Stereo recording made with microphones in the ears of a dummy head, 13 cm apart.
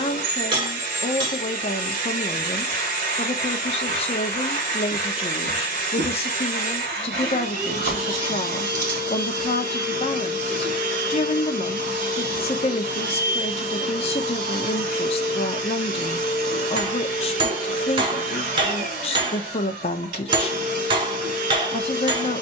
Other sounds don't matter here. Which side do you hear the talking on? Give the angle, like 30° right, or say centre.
40° left.